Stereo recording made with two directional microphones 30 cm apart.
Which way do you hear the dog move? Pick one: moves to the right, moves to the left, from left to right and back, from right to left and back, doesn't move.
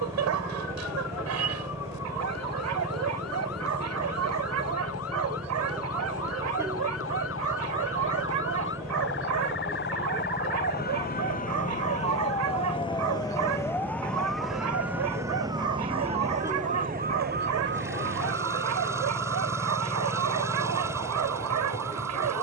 doesn't move.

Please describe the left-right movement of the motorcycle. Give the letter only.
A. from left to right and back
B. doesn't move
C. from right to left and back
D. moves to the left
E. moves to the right
B.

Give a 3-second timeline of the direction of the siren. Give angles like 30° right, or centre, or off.
60° left, 60° left, 50° left, 30° left, 10° left, 20° right, 50° right, 60° right.